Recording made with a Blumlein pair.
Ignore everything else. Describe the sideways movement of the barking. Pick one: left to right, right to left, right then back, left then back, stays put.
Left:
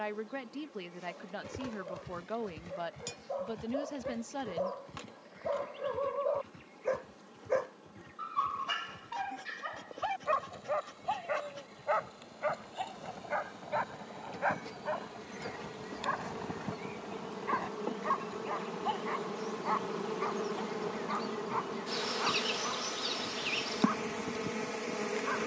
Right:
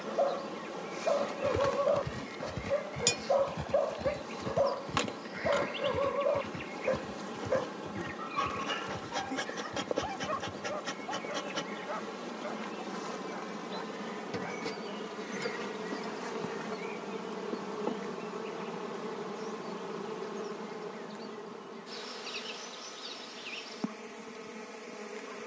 right to left.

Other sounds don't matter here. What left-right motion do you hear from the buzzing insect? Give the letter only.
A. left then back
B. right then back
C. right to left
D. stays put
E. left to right
C.